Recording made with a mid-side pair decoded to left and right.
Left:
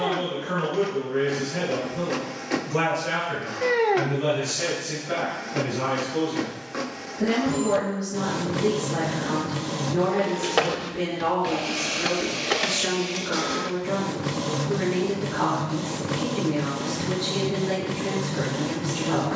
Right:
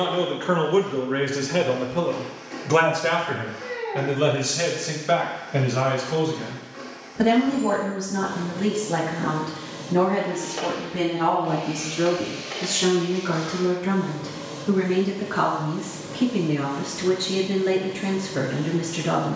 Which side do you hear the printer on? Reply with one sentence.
In this clip you hear the printer on the left.